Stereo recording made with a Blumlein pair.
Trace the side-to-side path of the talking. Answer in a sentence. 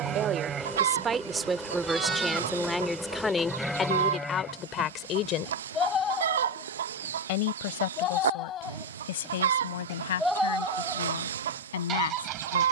In this clip you hear the talking move to the left.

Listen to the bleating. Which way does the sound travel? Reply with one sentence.
In this clip you hear the bleating move from right to left and back again.